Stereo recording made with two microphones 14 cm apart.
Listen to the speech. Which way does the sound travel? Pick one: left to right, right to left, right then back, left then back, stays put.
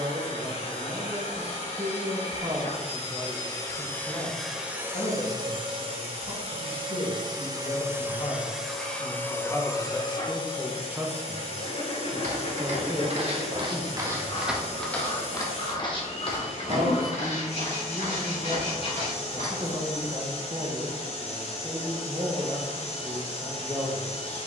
left then back.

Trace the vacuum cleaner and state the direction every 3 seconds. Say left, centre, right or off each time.
left, centre, right, left, left, left, left, left.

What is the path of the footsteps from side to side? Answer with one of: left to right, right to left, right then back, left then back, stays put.
right to left.